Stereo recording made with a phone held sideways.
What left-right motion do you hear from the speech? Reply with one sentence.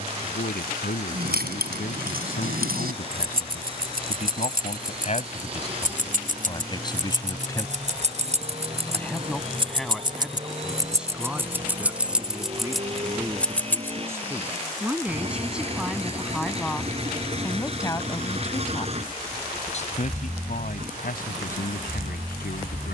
You can hear the speech go right and come back.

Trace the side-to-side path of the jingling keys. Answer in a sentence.
In this clip you hear the jingling keys move to the left.